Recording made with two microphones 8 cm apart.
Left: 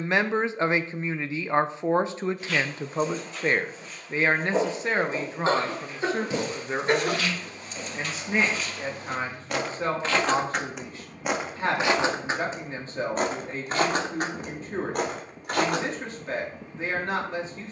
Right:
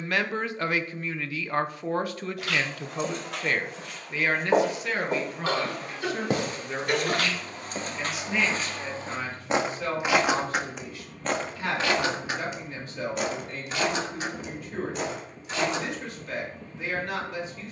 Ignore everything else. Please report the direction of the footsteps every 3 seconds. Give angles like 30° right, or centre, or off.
80° right, 70° right, 50° right, centre, 40° left, 50° left.